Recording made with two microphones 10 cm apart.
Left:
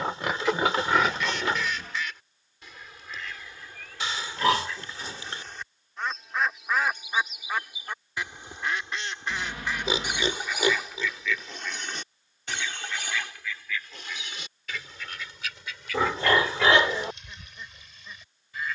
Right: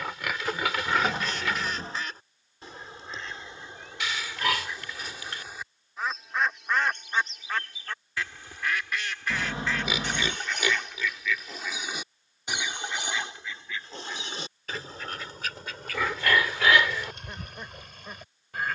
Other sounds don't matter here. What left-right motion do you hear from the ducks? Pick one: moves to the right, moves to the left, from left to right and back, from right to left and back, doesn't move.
from right to left and back.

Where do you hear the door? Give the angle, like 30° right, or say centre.
30° right.